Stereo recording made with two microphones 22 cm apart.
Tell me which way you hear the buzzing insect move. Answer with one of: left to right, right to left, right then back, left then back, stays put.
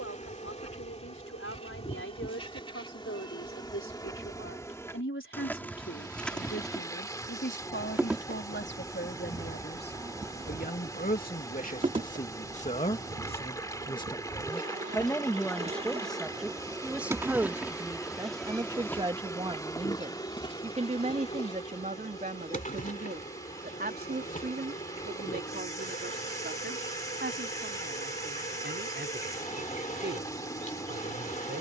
right then back.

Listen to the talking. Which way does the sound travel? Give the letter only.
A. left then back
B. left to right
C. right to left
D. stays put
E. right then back
B.